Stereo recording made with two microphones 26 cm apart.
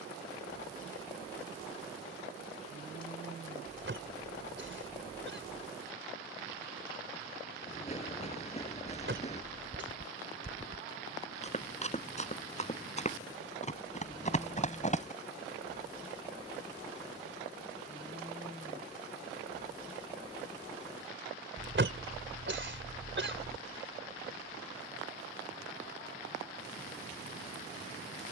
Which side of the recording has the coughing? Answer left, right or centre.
right.